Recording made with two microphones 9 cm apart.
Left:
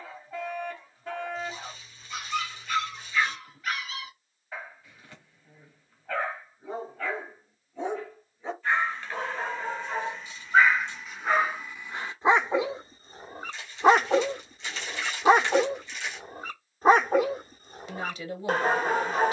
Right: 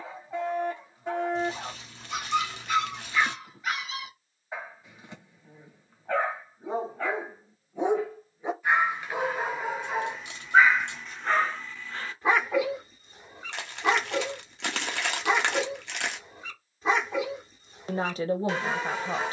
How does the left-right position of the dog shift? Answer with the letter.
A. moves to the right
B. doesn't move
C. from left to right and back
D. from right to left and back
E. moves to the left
E.